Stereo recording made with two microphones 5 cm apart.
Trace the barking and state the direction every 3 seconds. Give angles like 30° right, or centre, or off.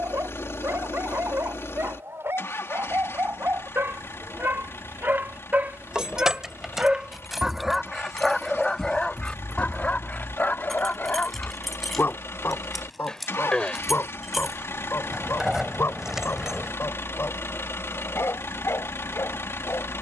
70° right, 50° right, 10° right, 30° left, 50° left, 60° left, 70° left.